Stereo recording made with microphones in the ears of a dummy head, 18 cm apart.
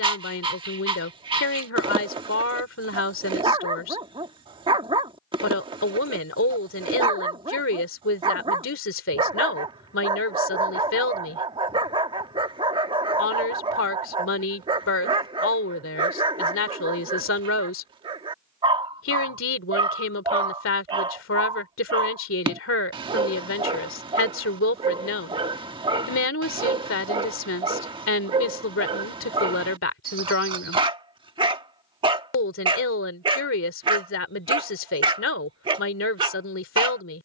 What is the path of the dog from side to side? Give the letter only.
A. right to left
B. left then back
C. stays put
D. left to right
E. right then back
C.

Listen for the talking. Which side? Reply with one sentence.
In this clip you hear the talking on the left.